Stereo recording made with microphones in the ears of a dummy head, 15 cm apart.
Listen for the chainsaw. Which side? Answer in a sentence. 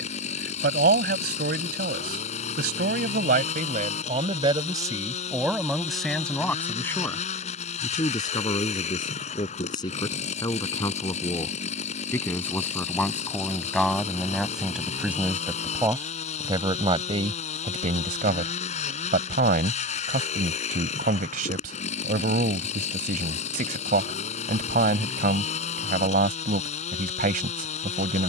You can hear the chainsaw on the left.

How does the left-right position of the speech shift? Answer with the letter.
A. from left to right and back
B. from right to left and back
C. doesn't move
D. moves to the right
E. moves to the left
B.